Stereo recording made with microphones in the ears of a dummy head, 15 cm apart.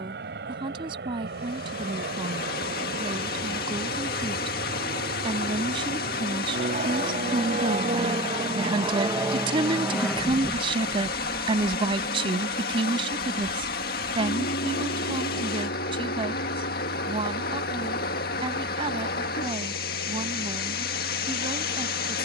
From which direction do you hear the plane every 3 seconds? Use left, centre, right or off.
right, right, right, centre, left, left, left, left.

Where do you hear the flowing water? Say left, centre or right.
left.